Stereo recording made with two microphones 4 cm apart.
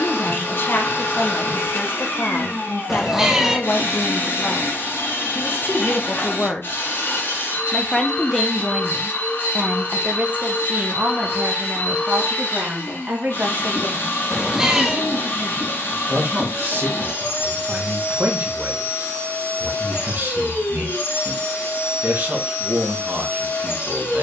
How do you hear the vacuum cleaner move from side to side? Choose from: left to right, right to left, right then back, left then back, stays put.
stays put.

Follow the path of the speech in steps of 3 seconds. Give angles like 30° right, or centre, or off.
50° left, 50° left, 10° left, 30° right, 50° right, 50° right, 50° right, 50° right.